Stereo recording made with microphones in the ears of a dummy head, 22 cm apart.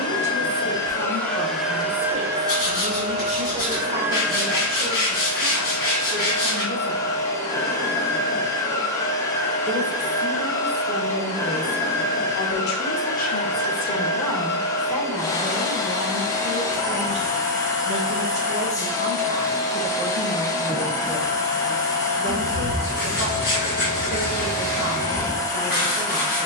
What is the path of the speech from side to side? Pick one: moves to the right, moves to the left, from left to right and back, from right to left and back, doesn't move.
from right to left and back.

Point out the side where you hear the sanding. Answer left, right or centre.
left.